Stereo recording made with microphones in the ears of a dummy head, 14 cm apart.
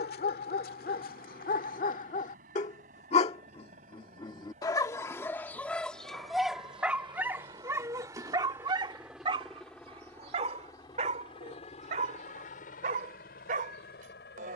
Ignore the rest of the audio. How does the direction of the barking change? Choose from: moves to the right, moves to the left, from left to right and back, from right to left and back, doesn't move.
moves to the right.